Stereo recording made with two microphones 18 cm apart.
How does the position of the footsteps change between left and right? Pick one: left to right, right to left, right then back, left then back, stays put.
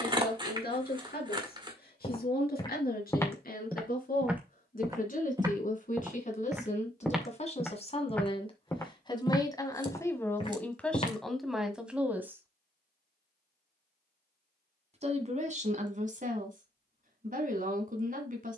right then back.